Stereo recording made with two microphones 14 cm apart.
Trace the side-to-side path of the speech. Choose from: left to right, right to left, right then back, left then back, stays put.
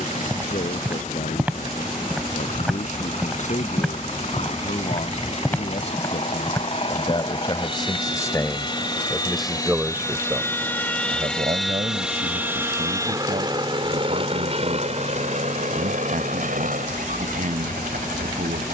left to right.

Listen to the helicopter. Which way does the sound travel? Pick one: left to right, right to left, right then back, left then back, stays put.
left to right.